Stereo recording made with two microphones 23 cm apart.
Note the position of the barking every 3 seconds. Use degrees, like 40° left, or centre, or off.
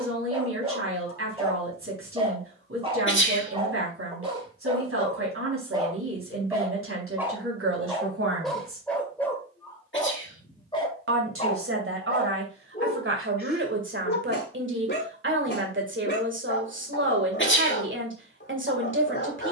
20° right, 20° right, 10° right, 20° left, 40° left, 50° left, 50° left.